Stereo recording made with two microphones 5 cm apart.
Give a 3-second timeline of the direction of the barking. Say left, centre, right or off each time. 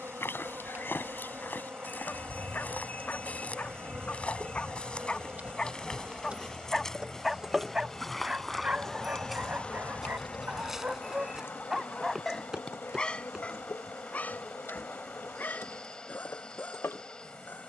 left, left, centre, right, left, left.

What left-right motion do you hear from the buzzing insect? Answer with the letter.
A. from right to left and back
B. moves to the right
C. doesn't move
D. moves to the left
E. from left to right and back
D.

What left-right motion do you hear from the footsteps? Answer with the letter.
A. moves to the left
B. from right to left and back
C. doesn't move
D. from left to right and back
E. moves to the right
E.